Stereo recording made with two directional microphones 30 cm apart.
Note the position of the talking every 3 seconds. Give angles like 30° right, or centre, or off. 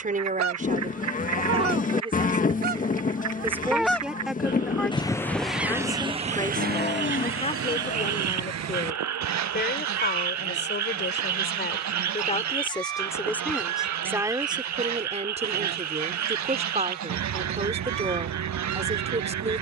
20° right, centre, 20° left, 30° left, centre, 20° right, 20° right.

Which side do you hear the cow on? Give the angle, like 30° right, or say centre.
30° left.